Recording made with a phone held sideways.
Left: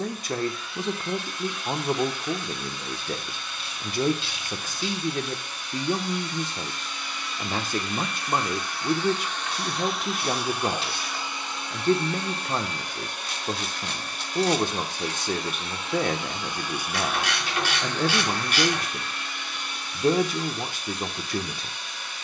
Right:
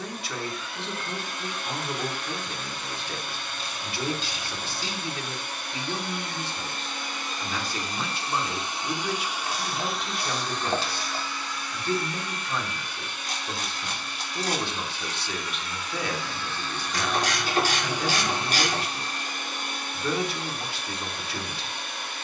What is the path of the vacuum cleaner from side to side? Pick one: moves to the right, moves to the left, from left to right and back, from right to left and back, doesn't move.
from right to left and back.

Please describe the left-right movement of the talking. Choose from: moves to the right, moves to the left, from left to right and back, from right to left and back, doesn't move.
doesn't move.